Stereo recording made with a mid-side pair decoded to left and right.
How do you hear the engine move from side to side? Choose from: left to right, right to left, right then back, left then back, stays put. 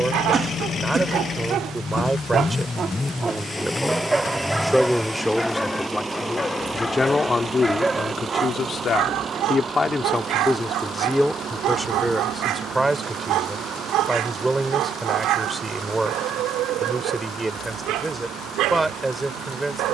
left to right.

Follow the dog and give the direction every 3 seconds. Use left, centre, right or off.
right, centre, centre, right, right, right, right.